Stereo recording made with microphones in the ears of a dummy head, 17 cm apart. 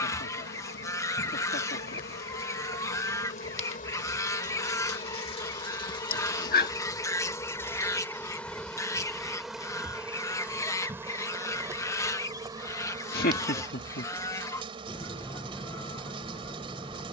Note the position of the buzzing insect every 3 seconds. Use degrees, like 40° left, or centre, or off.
60° left, 40° left, 20° left, 10° right, 20° right, 30° right.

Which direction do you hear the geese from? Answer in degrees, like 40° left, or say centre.
10° left.